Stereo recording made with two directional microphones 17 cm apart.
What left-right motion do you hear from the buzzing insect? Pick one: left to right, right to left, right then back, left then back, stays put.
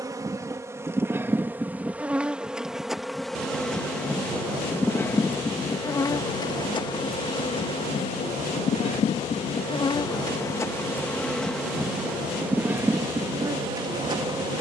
left then back.